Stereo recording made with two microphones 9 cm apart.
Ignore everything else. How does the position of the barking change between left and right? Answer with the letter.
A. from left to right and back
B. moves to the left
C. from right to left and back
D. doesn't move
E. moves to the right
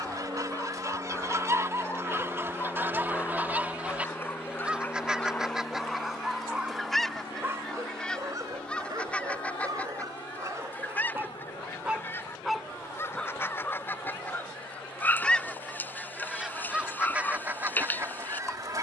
A.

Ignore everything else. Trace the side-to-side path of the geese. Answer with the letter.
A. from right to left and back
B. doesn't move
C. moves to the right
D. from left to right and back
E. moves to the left
A.